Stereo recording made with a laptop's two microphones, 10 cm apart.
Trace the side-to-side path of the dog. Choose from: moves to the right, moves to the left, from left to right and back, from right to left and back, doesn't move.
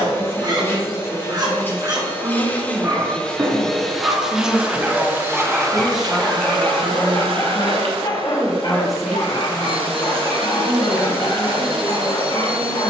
moves to the left.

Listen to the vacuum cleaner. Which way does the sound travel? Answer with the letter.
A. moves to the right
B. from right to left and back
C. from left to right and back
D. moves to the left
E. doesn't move
A.